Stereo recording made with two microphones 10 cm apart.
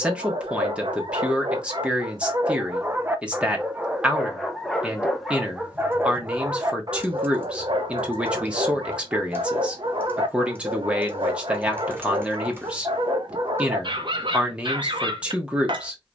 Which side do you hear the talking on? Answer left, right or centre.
centre.